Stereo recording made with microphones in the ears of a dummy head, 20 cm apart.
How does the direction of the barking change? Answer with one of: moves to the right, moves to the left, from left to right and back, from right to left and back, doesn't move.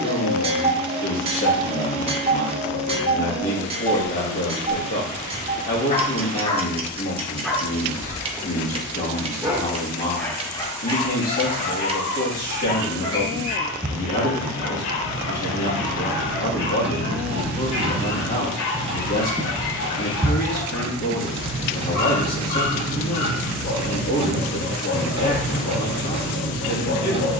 from left to right and back.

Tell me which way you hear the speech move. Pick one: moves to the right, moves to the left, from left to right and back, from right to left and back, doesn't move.
doesn't move.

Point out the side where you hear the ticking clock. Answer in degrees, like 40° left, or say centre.
30° right.